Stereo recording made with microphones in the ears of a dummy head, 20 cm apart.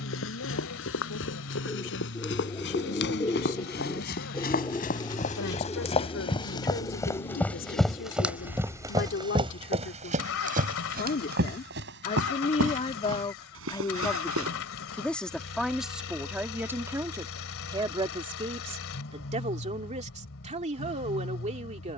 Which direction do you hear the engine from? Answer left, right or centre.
left.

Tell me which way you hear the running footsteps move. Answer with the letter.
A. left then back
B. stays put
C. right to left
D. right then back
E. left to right
E.